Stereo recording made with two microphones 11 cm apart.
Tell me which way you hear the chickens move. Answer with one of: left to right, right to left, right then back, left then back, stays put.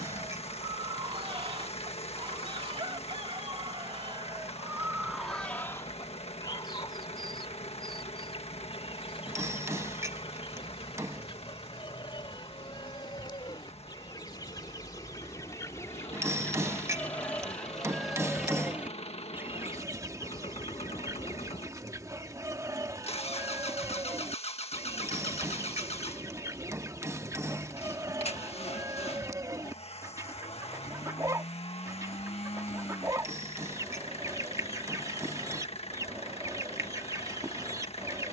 left then back.